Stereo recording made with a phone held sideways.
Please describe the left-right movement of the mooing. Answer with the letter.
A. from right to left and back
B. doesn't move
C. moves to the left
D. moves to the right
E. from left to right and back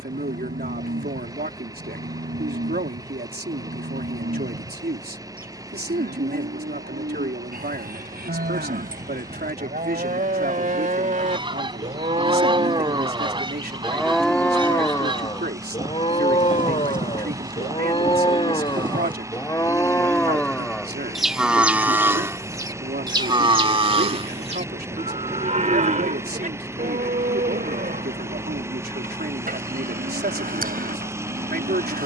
A.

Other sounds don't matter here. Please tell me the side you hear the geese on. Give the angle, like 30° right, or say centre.
30° right.